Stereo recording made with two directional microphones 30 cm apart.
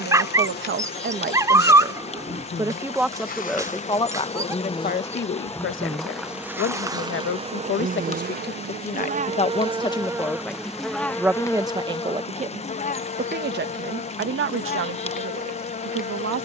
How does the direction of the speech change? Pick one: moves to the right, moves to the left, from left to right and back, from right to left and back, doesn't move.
from right to left and back.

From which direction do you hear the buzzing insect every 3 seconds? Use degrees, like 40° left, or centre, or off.
30° left, 20° left, 20° right, centre, 30° left, 30° left.